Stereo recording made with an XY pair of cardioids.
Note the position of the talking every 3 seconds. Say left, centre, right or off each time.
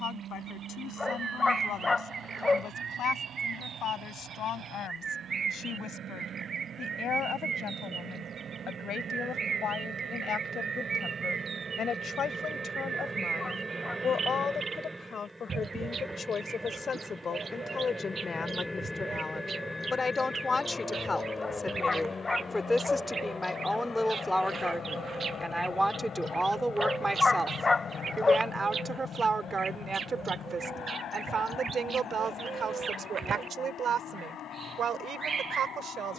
left, left, left, left, left, left, left, centre, centre, right, right, right.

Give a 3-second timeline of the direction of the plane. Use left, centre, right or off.
right, right, right, right, right, centre, centre, left, left, left, left, left.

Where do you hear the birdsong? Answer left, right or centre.
right.